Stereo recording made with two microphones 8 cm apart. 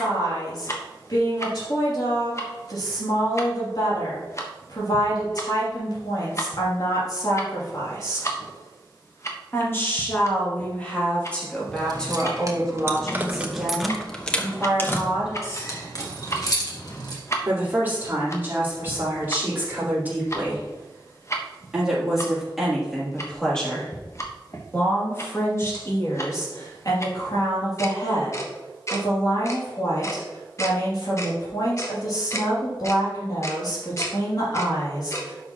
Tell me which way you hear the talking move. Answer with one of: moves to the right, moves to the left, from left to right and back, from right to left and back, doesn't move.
from left to right and back.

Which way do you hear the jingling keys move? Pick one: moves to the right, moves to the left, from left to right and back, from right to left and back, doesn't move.
moves to the left.